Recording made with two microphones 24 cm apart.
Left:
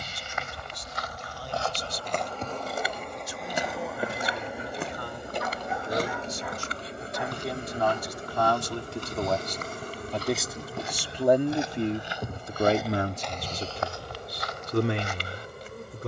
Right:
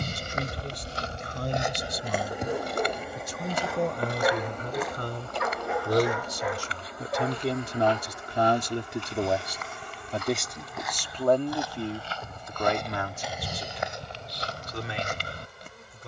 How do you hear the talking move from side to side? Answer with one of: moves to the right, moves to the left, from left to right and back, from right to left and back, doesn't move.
moves to the left.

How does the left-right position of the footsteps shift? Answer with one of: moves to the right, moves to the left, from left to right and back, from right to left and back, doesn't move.
from right to left and back.